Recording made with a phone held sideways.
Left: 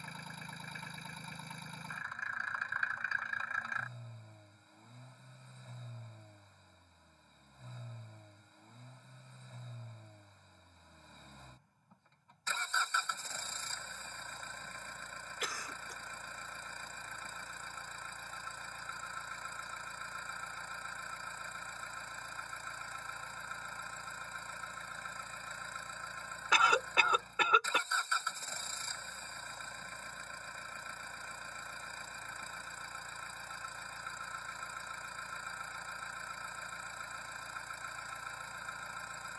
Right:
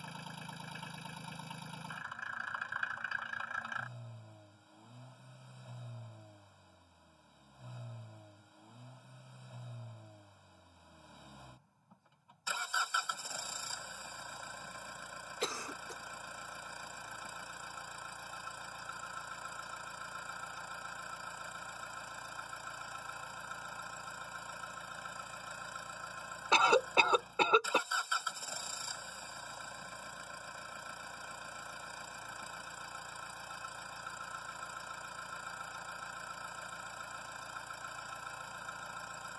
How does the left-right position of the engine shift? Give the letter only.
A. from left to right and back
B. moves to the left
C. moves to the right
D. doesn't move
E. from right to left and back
D.